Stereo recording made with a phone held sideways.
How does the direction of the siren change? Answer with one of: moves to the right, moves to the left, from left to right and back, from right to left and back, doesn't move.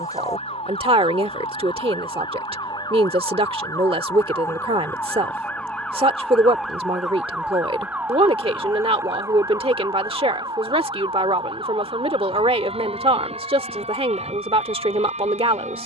moves to the right.